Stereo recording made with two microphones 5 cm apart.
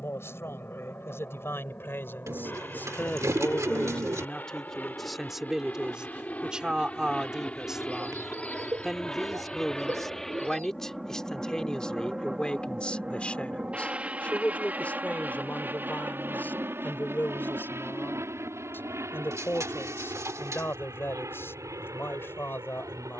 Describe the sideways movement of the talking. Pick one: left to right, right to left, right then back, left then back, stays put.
right then back.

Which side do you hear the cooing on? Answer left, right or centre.
right.